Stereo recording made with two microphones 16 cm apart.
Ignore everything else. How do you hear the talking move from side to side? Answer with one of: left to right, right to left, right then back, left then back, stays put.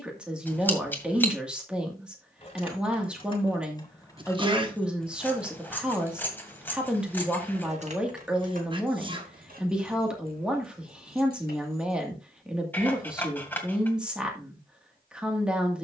stays put.